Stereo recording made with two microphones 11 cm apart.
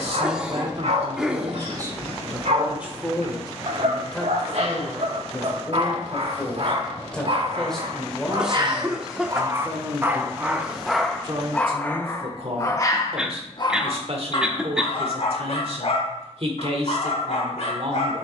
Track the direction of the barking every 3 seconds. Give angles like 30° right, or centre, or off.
70° right, 70° right, 50° right, 10° right, 40° left, 60° left.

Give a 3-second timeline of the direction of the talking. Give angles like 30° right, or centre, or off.
40° right, 10° left, 10° left, 30° right, 60° right, 60° right.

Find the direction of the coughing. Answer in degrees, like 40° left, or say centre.
10° right.